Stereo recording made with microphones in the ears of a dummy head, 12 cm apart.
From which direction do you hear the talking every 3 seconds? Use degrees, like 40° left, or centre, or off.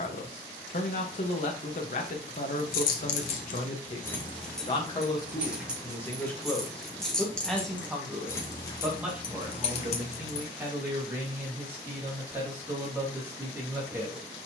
50° left, 40° left, centre, 10° right, 20° right.